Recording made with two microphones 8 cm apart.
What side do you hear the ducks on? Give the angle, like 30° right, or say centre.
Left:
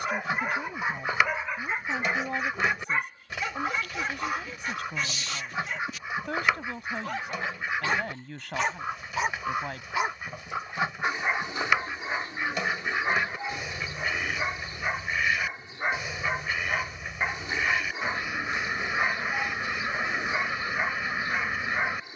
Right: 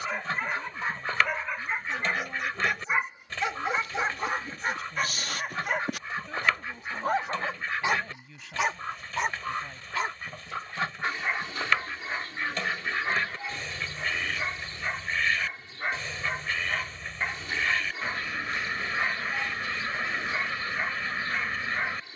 10° left.